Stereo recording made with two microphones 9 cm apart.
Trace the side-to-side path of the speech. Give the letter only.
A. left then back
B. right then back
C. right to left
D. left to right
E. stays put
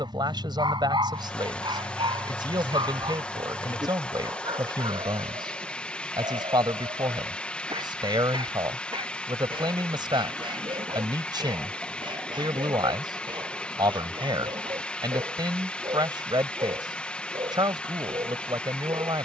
E.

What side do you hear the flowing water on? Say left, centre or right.
centre.